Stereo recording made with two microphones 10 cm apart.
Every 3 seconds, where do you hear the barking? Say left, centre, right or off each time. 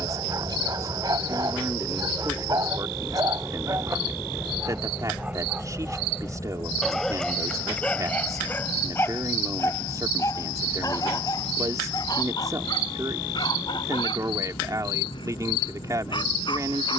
right, right, centre, left, left, left.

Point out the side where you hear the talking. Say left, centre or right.
right.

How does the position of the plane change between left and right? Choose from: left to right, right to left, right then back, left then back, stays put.
right to left.